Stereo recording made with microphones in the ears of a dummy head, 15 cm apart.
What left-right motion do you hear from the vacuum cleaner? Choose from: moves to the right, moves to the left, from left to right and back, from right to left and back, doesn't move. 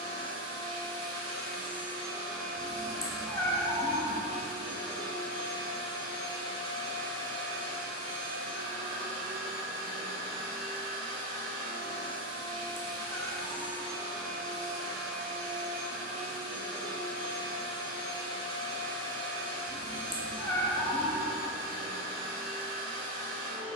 doesn't move.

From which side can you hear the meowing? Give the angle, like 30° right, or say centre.
20° left.